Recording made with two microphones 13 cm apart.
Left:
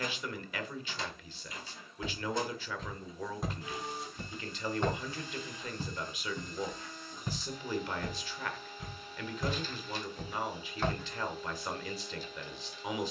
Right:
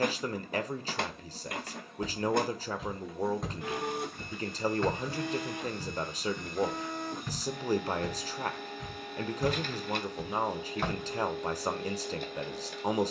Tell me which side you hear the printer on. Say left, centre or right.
right.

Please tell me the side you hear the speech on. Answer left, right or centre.
right.